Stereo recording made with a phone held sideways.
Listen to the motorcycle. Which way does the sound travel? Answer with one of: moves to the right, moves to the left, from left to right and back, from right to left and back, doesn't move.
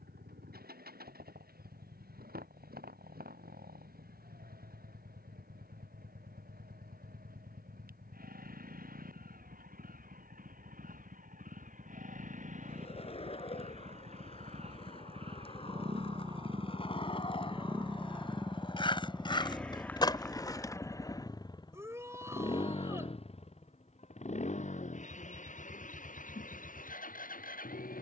moves to the left.